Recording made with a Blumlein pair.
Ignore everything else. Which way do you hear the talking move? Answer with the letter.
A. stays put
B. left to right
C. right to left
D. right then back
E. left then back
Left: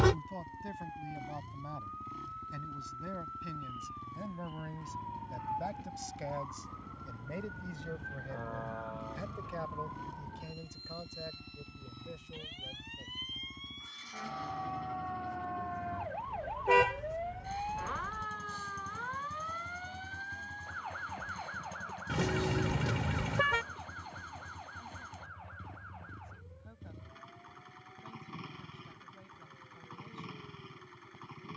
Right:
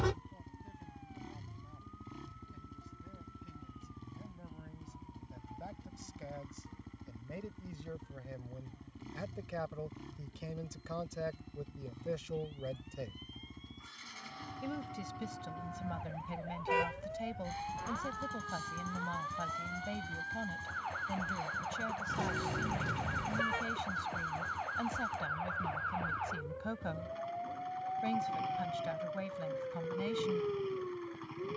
B.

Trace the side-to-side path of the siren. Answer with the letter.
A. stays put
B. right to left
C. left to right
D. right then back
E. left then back
C.